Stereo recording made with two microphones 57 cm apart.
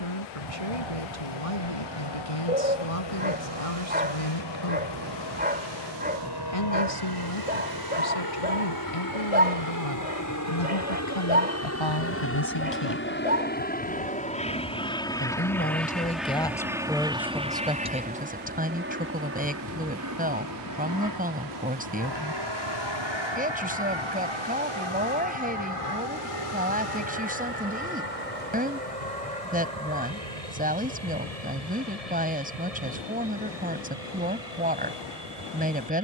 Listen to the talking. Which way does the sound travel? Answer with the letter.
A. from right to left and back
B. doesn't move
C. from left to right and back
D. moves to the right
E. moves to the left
D.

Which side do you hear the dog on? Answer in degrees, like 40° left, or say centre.
20° right.